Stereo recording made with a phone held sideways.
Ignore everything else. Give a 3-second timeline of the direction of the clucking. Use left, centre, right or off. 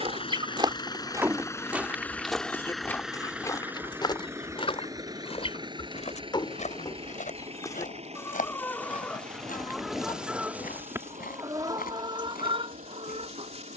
centre, left, left, centre, right.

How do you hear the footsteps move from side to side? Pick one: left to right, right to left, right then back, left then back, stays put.
right to left.